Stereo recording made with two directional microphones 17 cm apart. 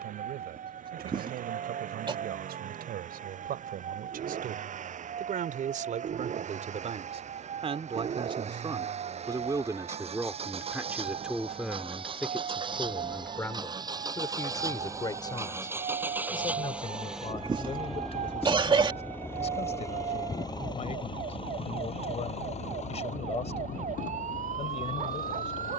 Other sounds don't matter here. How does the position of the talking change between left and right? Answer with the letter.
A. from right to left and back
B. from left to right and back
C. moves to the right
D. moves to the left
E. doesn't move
D.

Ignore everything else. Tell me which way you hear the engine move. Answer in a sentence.
You can hear the engine go from the right side to the left.